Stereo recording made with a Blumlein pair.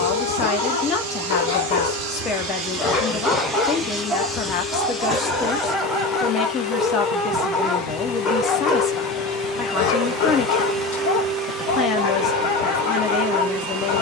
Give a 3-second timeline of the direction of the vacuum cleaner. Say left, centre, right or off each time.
right, centre, left, centre, right.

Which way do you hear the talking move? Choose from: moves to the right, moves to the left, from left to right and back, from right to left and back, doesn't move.
doesn't move.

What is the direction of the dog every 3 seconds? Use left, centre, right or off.
left, centre, centre, left, left.